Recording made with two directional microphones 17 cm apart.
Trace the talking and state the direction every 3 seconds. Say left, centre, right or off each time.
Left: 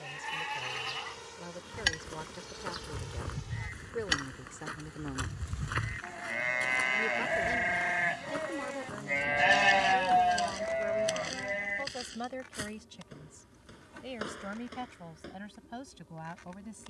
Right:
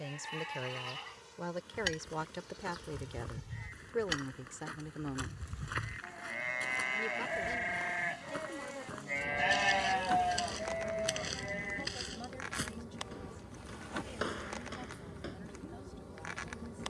right, centre, left, left, left, left.